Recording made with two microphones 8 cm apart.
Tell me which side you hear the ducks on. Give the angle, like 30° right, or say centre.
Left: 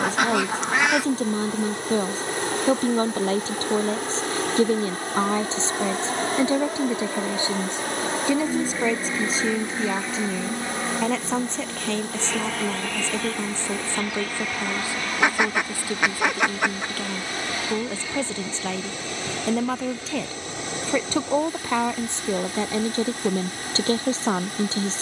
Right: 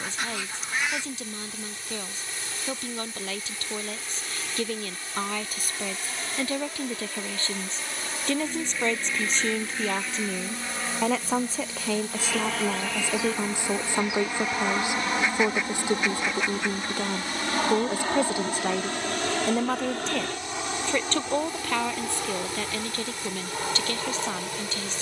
70° left.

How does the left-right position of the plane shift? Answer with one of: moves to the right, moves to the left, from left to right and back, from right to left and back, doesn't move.
moves to the right.